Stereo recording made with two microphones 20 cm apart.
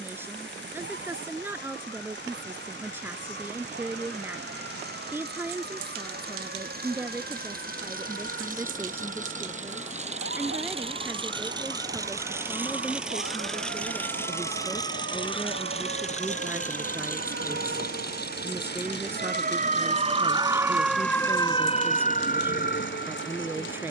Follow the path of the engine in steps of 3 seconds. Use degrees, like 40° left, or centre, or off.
60° right, 60° right, 50° right, 30° right, centre, 40° left, 60° left, 70° left.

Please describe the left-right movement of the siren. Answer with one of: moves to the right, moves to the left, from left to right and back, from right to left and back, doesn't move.
moves to the left.